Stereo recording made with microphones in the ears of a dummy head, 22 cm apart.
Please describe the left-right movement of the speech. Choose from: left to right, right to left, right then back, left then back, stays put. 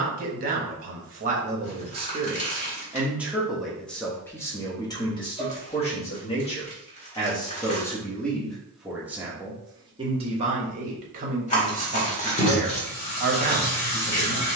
left then back.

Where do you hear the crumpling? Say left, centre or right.
left.